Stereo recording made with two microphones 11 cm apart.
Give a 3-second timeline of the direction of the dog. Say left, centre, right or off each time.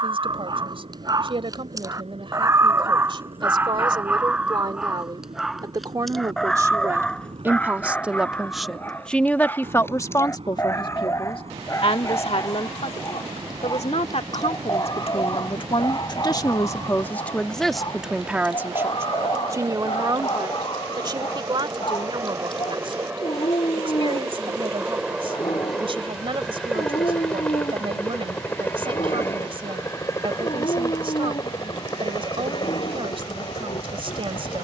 right, centre, centre, left, left, left, left, left, left, left, left, left.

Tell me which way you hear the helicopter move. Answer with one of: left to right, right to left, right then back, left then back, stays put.
right to left.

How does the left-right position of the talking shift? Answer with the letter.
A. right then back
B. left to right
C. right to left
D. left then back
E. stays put
D.